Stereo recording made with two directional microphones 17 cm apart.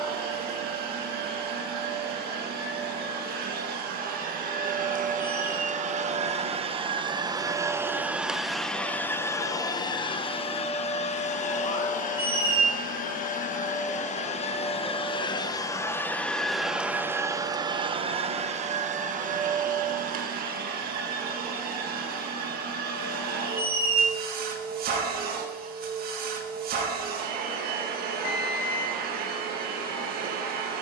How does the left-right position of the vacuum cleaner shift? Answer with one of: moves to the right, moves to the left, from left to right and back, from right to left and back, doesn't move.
from right to left and back.